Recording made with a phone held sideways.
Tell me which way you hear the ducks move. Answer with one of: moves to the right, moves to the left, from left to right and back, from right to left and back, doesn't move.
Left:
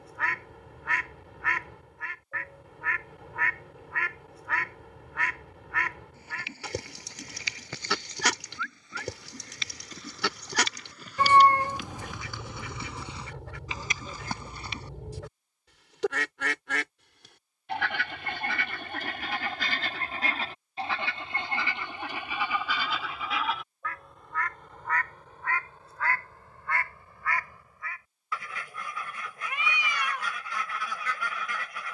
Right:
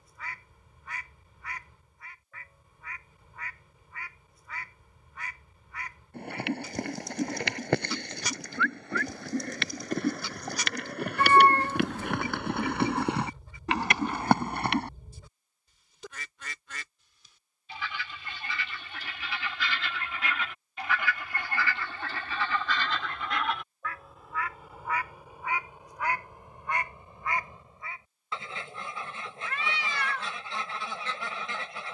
moves to the right.